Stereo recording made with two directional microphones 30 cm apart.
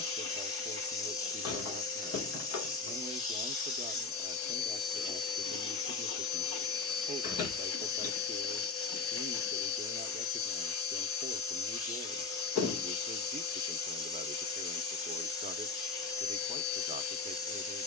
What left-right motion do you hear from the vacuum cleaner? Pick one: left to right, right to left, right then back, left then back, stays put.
stays put.